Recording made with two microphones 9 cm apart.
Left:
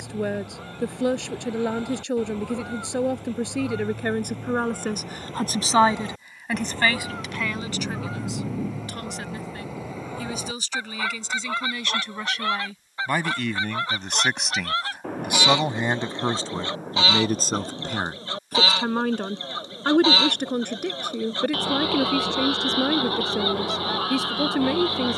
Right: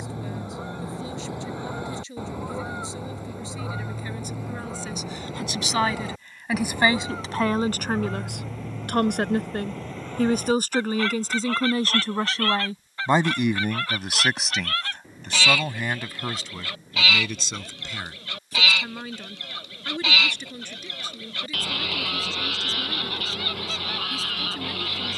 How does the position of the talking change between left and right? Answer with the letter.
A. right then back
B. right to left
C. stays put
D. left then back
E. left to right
A.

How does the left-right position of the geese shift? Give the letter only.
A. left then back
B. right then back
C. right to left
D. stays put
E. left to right
C.